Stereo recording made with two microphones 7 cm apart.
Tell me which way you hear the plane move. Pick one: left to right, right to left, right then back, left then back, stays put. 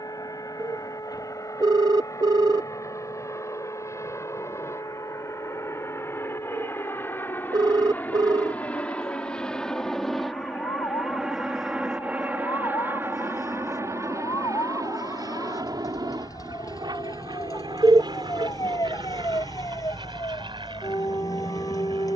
left to right.